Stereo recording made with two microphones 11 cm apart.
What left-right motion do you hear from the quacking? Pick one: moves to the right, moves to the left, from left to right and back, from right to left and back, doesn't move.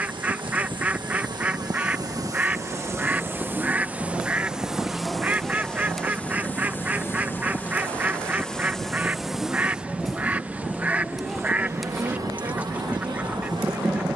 doesn't move.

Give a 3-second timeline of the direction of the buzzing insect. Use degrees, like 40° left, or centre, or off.
40° right, 10° right, 10° left, 20° right, 40° right.